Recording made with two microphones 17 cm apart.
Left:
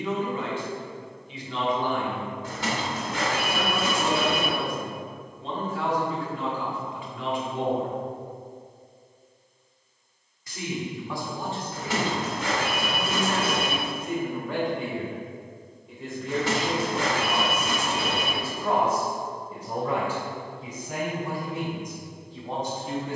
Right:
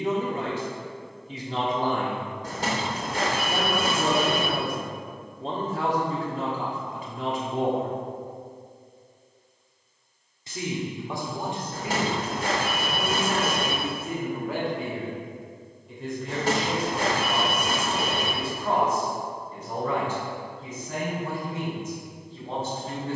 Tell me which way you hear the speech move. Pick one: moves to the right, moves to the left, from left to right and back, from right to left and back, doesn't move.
moves to the left.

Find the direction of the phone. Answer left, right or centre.
right.